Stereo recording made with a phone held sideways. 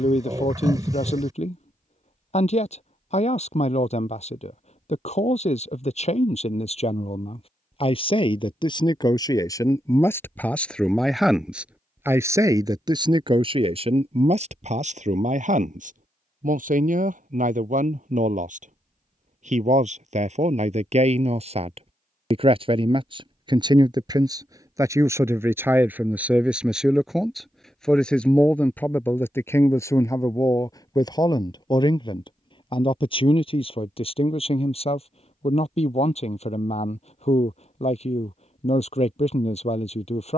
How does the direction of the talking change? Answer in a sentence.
In this clip you hear the talking go right and come back.